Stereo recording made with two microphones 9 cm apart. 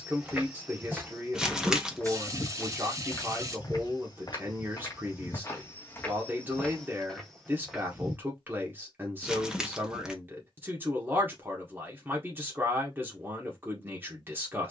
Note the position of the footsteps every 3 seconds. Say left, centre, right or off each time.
centre, left, centre, off, off.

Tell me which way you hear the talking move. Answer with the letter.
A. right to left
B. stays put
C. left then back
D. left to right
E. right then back
B.